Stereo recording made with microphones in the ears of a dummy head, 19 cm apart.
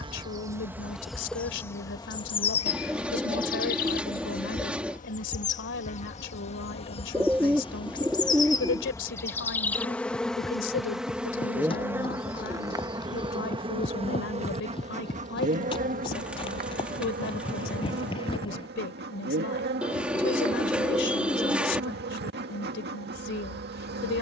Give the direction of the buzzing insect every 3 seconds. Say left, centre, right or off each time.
centre, left, left, centre, right, right, right, right.